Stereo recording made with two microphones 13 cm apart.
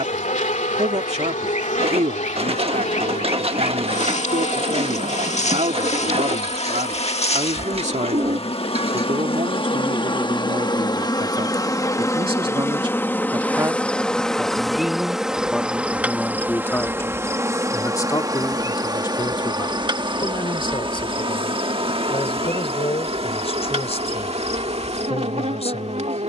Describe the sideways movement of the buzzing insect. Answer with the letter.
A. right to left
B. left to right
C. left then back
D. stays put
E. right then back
B.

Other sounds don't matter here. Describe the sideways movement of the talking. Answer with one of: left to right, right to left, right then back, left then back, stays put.
right to left.